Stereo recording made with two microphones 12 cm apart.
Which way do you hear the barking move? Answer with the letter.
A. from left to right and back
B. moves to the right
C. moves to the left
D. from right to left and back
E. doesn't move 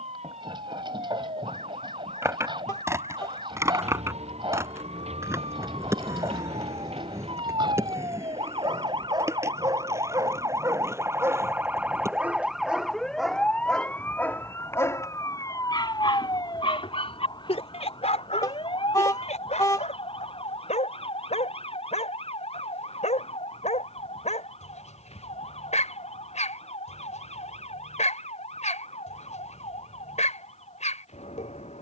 C.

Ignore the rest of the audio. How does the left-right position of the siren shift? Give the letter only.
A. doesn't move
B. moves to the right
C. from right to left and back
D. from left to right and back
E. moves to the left
E.